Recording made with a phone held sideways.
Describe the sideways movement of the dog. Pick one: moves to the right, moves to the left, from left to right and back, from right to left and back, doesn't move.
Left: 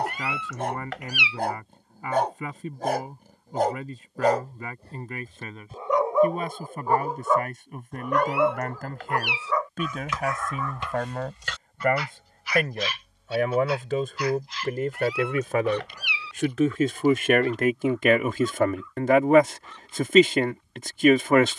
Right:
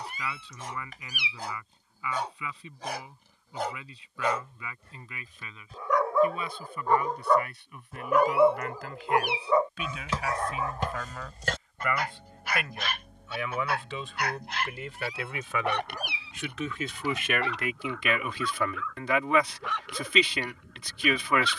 moves to the right.